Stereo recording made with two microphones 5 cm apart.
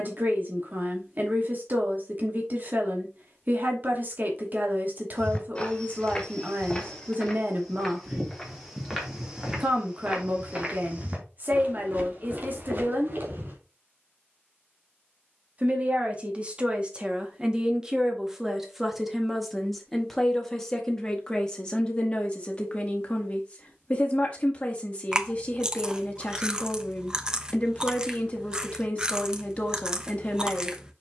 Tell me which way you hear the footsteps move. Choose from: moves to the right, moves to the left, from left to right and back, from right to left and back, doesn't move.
moves to the right.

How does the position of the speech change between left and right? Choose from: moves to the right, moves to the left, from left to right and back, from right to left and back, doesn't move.
moves to the left.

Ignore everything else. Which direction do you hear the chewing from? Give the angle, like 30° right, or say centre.
20° right.